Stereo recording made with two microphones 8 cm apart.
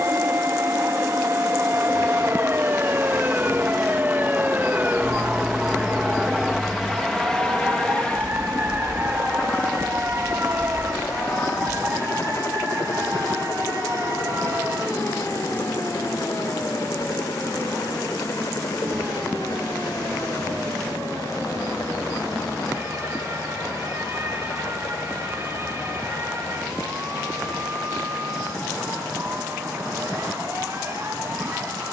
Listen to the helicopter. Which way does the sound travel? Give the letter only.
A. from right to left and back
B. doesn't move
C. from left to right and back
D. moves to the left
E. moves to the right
D.